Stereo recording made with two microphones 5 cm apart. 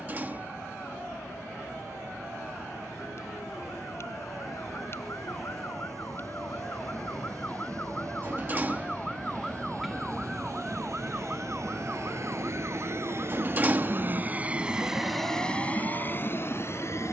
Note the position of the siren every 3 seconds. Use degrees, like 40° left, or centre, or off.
60° left, 50° left, 30° left, 10° right, 40° right, 60° right.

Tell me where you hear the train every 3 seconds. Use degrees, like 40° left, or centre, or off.
80° right, 80° right, 80° right, 70° right, 40° right, 30° left.